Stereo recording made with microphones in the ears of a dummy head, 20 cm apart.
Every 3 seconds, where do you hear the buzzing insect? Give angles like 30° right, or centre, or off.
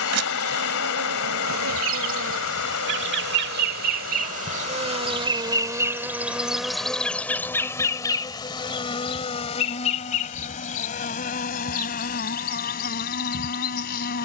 60° right, 30° right, 10° left, 30° left, 40° left.